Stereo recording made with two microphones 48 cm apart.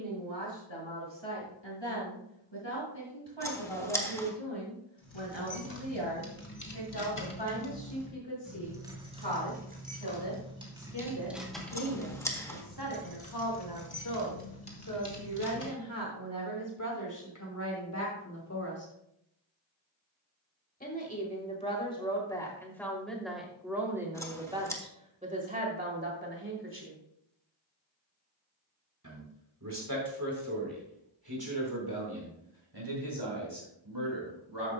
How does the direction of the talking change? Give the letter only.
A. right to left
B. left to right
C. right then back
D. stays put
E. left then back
B.